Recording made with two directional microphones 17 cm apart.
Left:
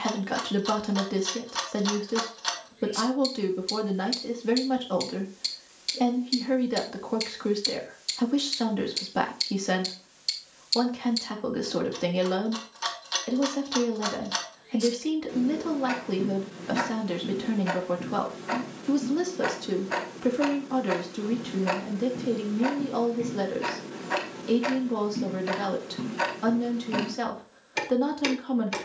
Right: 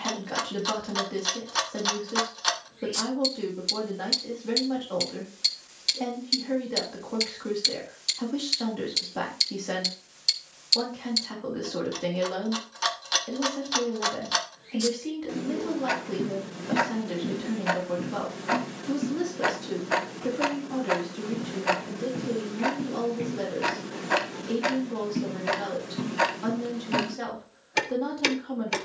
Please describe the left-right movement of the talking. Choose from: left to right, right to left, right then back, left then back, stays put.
stays put.